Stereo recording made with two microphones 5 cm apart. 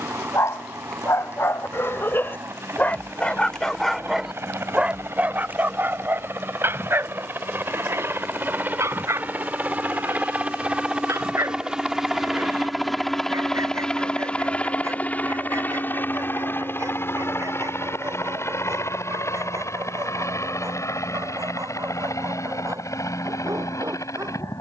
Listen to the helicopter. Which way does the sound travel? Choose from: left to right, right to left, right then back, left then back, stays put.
right to left.